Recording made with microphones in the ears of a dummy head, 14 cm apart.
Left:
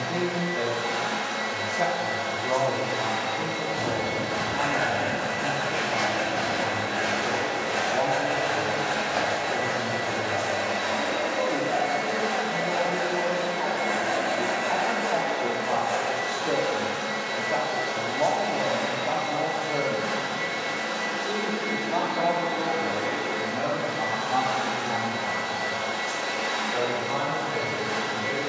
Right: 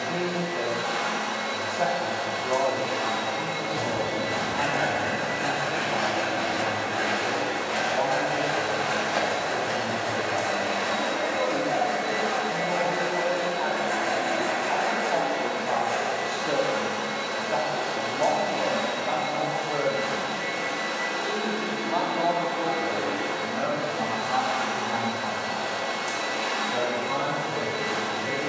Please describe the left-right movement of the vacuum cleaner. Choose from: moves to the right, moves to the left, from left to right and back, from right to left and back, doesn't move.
doesn't move.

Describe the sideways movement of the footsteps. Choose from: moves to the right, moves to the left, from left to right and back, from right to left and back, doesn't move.
from right to left and back.